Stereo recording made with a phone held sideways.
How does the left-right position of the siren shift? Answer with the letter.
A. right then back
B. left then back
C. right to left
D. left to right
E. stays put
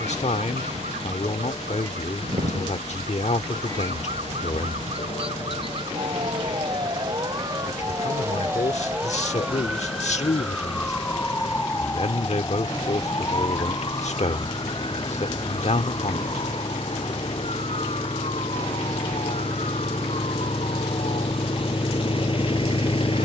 C.